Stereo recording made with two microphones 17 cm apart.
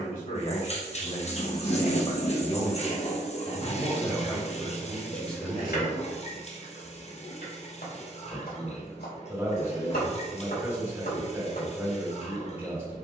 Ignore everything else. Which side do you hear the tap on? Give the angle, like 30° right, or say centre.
40° left.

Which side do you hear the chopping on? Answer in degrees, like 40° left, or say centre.
70° left.